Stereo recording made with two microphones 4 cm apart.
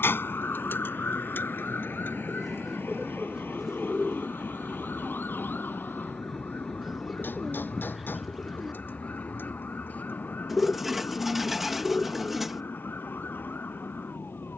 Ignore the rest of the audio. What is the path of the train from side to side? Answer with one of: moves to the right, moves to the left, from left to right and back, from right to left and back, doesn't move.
moves to the left.